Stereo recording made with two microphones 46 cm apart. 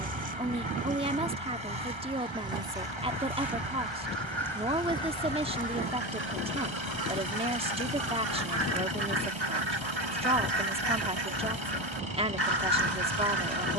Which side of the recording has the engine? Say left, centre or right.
right.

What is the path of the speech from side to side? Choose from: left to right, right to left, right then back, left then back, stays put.
stays put.